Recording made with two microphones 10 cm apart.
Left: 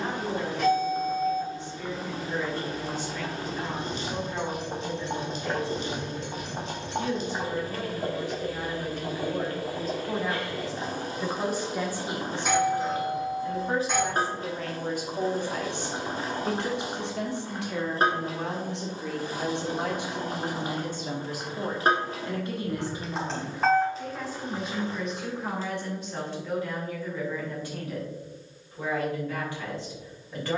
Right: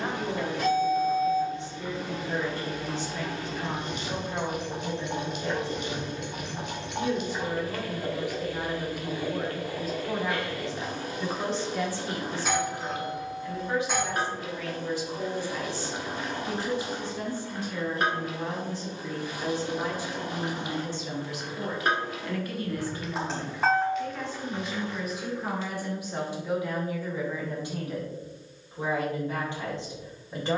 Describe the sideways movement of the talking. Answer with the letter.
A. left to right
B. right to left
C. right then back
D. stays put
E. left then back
E.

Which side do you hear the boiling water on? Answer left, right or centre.
left.